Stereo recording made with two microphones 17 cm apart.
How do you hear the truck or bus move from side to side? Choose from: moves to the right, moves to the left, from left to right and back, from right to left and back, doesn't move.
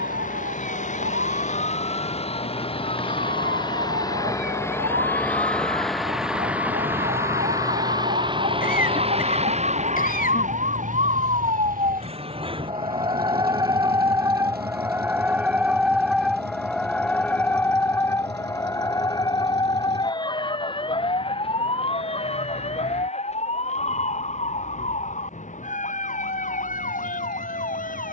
moves to the right.